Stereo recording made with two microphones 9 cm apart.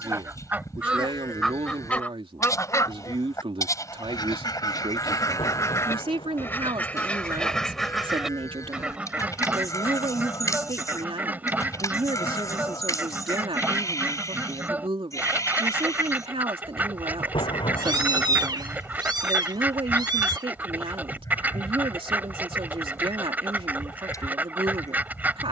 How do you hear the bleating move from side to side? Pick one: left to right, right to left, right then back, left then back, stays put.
stays put.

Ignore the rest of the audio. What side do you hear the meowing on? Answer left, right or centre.
right.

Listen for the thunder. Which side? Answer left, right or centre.
left.